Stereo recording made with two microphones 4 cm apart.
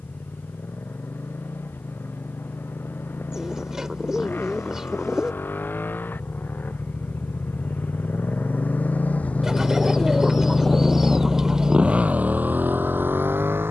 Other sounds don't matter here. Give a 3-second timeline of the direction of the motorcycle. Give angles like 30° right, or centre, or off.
70° left, 60° left, 50° left, 10° left, 50° right.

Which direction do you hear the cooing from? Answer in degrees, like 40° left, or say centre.
20° right.